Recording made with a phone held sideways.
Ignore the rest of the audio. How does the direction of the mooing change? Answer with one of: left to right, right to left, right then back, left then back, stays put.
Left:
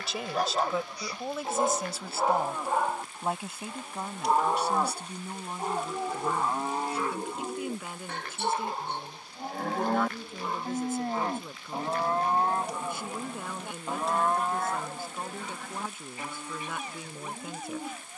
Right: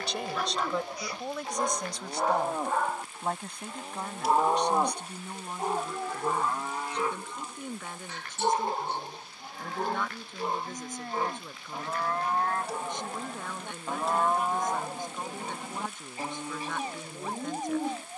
left then back.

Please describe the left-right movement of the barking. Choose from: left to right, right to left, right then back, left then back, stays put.
left to right.